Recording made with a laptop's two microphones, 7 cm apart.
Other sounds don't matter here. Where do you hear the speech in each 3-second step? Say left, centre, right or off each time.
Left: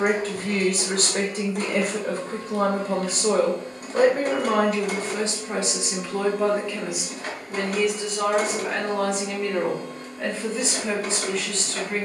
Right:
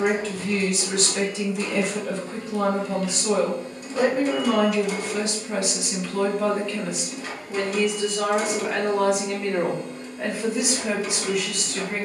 left, left, centre, centre.